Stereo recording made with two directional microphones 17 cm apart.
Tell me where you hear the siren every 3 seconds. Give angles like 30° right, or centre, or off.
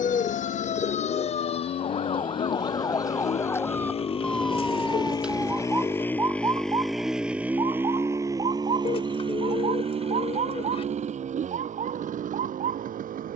40° left, centre, 30° right, 40° right, 50° right.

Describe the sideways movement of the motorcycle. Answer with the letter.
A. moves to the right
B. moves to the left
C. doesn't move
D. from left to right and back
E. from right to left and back
A.